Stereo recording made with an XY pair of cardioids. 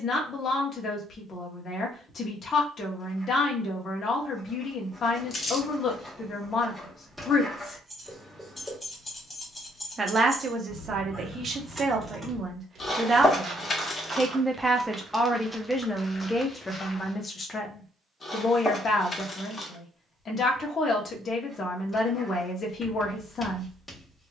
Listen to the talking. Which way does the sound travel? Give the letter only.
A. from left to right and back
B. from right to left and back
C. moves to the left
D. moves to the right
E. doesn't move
A.